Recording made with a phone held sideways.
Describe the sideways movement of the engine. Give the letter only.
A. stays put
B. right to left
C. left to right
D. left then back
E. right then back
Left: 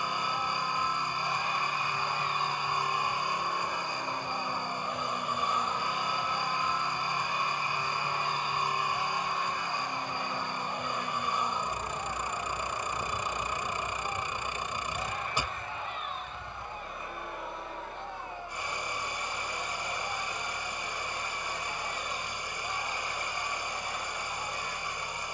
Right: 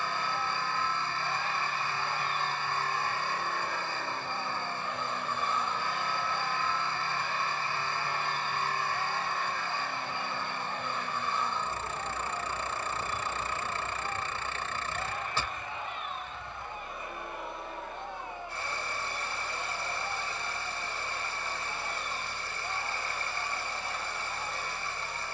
A.